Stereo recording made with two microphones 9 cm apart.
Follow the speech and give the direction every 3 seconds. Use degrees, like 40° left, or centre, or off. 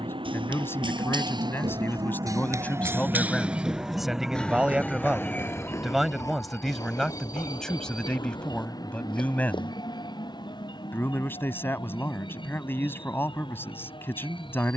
20° left, centre, centre, 20° left, 20° left.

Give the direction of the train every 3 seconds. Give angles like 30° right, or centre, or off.
50° right, centre, 30° left, 50° left, 60° left.